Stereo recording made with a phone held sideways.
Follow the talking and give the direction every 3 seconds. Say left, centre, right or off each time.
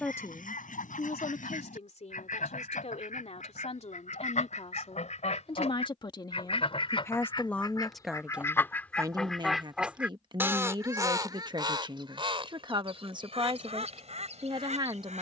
left, left, centre, right, right.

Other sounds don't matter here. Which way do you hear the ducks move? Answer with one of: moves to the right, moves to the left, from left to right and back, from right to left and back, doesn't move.
moves to the right.